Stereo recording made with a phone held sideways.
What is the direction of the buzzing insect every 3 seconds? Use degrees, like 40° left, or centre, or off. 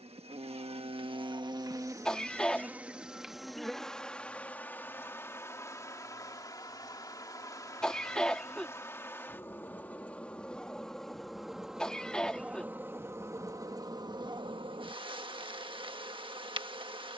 30° right, 10° left, 20° left, 10° left, 20° right, 30° right.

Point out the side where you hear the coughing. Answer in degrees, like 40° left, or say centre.
centre.